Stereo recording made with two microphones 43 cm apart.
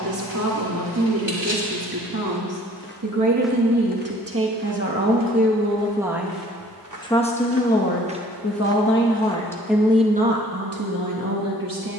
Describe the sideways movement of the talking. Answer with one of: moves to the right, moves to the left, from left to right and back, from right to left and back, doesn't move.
from right to left and back.